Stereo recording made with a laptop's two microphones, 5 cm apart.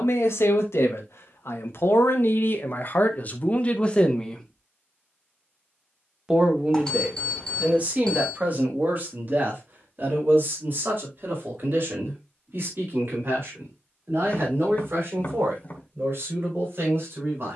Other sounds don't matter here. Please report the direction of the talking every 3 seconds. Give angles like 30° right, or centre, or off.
70° left, 30° left, 30° right, 40° right, 50° right, 50° right.